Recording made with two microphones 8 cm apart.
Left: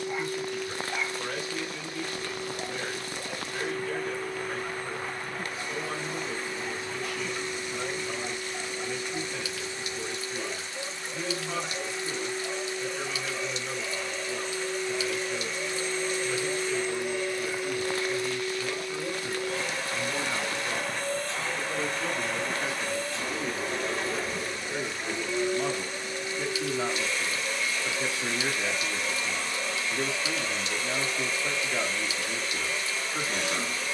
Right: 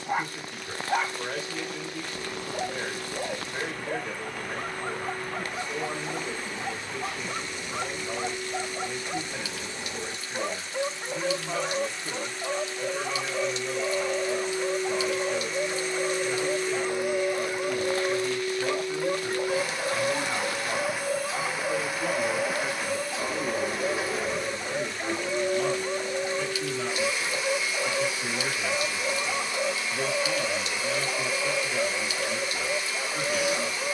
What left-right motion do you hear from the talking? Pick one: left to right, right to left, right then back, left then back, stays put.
right to left.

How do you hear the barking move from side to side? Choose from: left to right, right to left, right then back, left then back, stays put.
stays put.